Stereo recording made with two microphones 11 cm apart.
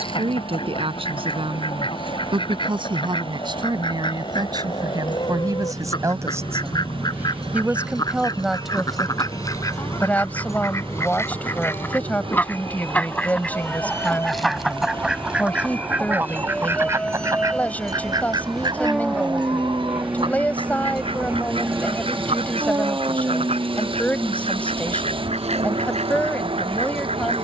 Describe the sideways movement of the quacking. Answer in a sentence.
You can hear the quacking go from the left side to the right.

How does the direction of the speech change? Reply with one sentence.
You can hear the speech move to the left.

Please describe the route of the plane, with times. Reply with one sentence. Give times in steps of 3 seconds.
You can hear the plane on the left from 0 s, in the centre from 15 s and on the right from 21 s.